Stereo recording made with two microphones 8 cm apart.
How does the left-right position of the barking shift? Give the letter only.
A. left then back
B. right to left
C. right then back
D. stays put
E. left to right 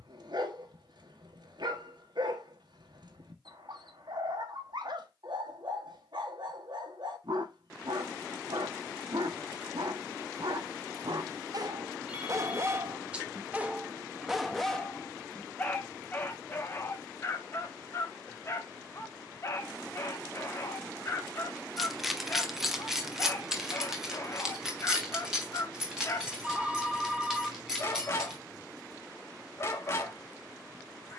B.